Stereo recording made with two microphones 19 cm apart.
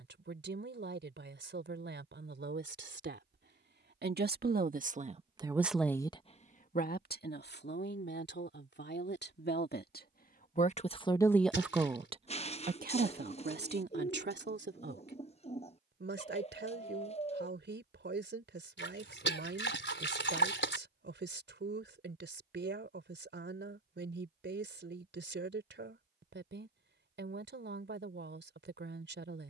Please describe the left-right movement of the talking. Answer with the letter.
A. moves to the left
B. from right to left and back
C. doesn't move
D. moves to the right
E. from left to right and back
B.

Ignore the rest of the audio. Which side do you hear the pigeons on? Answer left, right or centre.
left.